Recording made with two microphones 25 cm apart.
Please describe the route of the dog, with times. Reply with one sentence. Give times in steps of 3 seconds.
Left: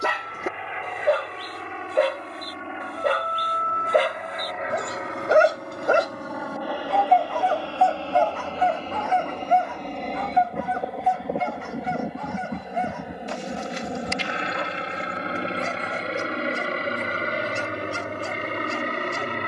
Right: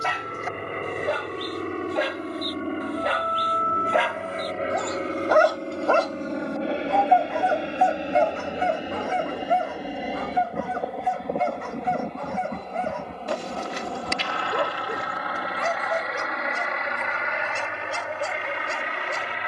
You can hear the dog on the left from 0 s, in the centre from 6 s and on the right from 9 s.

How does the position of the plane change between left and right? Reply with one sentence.
In this clip you hear the plane move from right to left.